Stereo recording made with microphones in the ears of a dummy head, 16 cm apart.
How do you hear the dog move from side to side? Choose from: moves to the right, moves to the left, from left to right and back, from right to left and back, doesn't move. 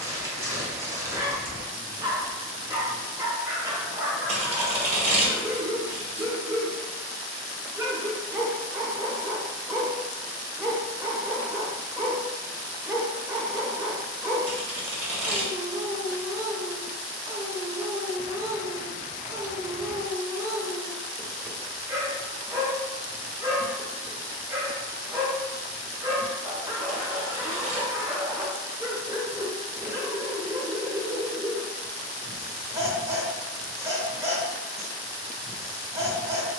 doesn't move.